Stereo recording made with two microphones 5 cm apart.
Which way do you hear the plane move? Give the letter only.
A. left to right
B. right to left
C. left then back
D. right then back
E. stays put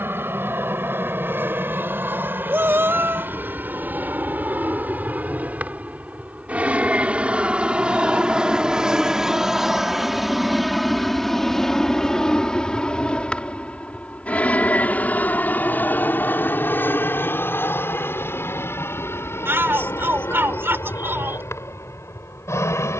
B.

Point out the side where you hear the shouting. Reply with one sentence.
In this clip you hear the shouting on the right.